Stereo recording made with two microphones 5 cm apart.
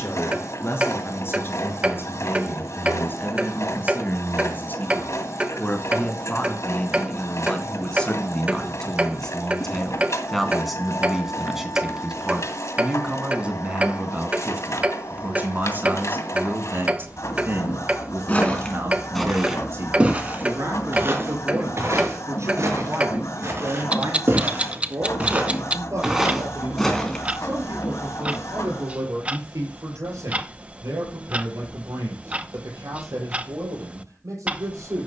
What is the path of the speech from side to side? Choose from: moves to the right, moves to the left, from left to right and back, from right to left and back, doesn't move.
moves to the right.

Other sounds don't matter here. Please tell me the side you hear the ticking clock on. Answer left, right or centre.
right.